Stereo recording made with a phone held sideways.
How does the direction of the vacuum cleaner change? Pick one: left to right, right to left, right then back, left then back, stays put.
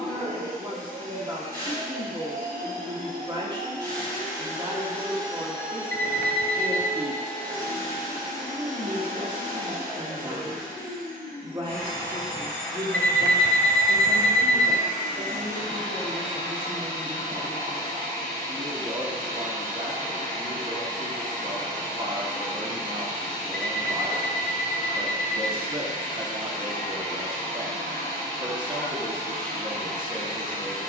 stays put.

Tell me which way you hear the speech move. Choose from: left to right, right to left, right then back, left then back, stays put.
stays put.